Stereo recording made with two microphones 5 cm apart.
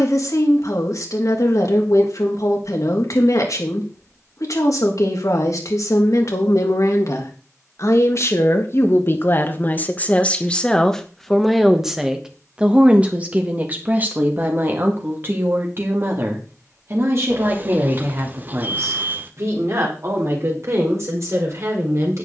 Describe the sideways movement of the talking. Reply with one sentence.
In this clip you hear the talking go from the left side to the right.